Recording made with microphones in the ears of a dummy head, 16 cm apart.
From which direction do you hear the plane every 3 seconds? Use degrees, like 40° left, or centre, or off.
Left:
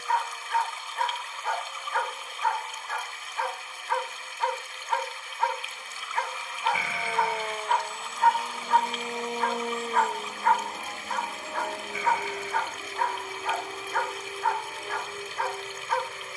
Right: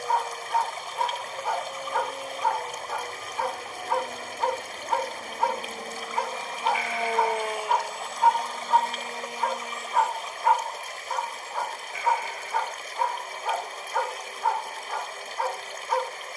60° right, 50° right, 10° right, 40° left, 60° left, 70° left.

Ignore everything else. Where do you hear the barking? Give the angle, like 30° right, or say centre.
10° right.